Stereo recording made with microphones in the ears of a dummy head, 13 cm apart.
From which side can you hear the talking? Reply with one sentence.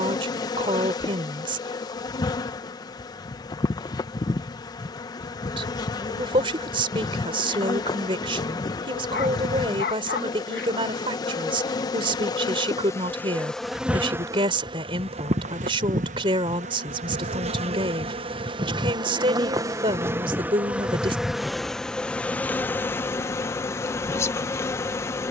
In this clip you hear the talking on the right.